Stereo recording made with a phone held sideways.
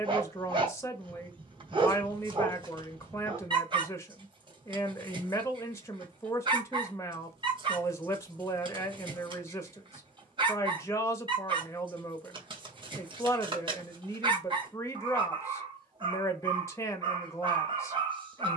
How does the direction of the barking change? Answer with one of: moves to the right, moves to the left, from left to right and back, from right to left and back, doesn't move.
doesn't move.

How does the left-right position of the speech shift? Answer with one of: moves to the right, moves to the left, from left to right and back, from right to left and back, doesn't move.
doesn't move.